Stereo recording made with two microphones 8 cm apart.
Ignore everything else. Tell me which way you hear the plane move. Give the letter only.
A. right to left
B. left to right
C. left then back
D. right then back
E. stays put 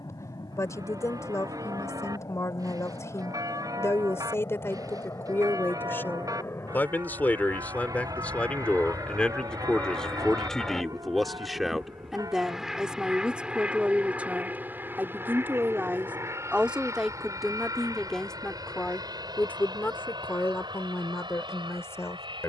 B.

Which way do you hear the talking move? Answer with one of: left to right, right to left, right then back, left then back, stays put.
right then back.